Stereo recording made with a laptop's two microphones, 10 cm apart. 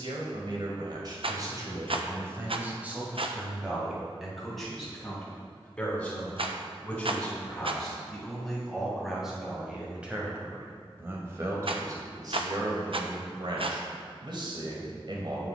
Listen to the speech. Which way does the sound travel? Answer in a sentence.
You can hear the speech move from right to left and back again.